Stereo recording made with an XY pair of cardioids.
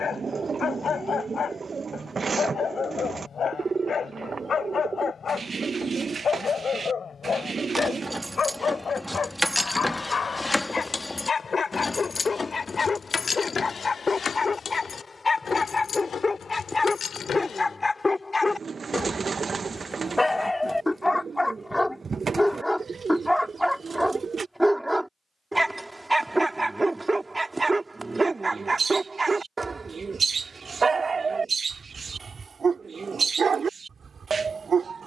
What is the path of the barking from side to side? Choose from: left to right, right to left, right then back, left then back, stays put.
left to right.